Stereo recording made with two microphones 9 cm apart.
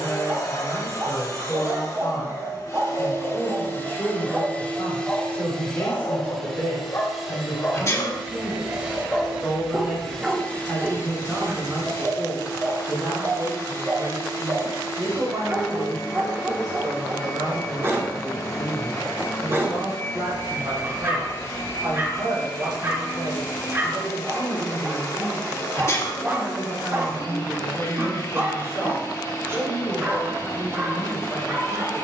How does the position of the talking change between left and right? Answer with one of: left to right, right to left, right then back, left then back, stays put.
right then back.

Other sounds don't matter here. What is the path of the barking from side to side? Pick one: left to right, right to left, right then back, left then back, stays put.
left then back.